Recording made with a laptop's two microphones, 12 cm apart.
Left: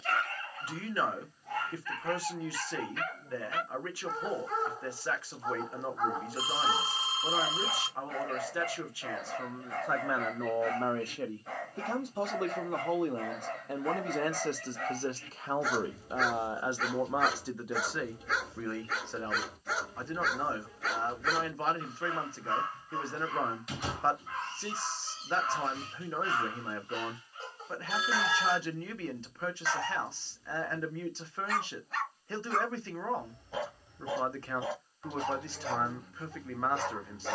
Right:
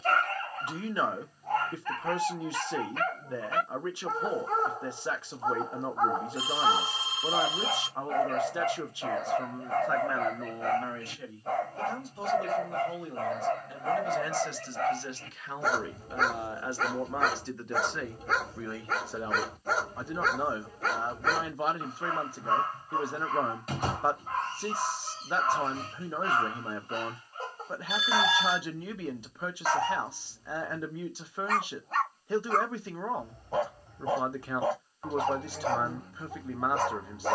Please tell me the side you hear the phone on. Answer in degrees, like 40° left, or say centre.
40° left.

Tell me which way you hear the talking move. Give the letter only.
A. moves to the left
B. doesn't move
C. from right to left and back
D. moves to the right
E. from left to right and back
C.